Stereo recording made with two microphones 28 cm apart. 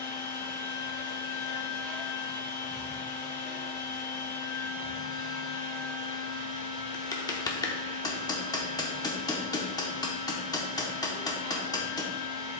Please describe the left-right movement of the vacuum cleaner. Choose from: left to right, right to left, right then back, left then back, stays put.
stays put.